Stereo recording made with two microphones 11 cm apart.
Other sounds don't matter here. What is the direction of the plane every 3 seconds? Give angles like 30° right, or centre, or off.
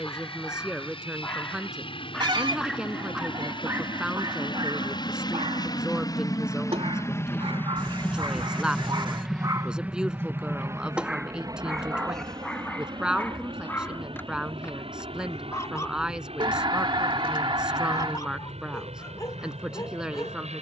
70° left, 50° left, 20° left, 20° right, 50° right, 60° right, 70° right.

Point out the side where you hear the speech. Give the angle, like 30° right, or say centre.
10° right.